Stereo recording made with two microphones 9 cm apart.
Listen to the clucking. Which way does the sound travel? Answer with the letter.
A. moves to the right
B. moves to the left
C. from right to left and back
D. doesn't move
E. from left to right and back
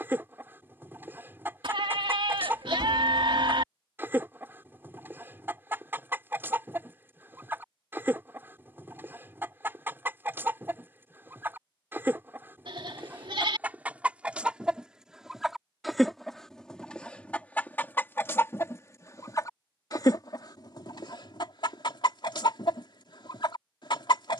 B.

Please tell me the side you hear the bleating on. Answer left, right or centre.
right.